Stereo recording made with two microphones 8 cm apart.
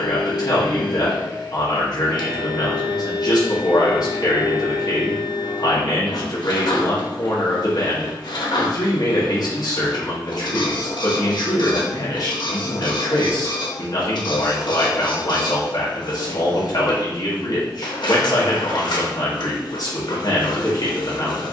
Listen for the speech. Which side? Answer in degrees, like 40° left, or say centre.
50° left.